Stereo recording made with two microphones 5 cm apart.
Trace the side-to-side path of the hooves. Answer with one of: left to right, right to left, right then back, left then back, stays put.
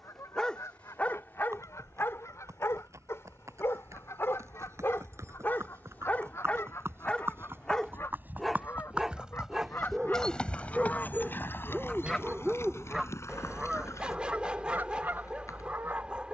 right to left.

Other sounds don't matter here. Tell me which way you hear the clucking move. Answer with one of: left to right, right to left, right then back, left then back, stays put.
left to right.